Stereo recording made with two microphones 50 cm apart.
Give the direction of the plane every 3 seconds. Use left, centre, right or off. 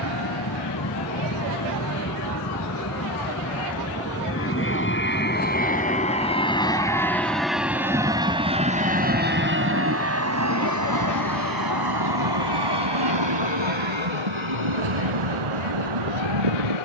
left, left, centre, right, right, right.